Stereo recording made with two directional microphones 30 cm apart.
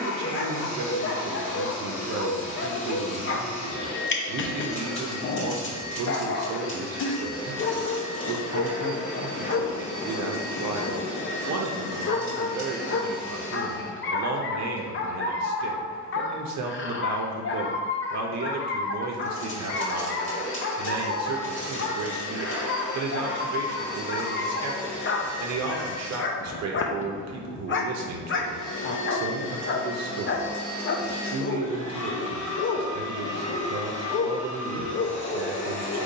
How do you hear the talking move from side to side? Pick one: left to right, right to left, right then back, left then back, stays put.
stays put.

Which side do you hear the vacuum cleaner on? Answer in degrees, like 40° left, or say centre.
40° left.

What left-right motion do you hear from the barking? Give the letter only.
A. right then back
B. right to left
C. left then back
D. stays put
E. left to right
D.